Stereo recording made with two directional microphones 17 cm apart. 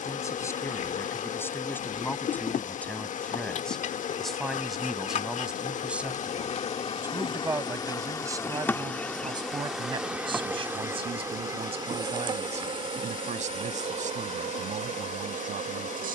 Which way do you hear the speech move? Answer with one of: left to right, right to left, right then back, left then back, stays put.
left to right.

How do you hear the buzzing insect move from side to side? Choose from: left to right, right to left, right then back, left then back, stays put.
left to right.